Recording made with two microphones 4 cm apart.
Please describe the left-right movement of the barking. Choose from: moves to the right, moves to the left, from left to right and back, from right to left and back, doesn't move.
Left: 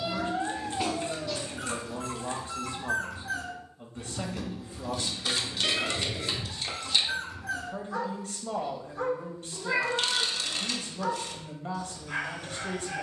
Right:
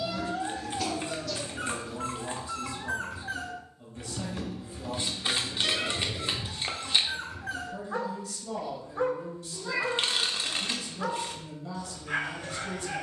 doesn't move.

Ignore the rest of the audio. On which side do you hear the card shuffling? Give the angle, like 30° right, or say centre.
30° right.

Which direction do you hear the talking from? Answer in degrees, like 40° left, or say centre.
40° left.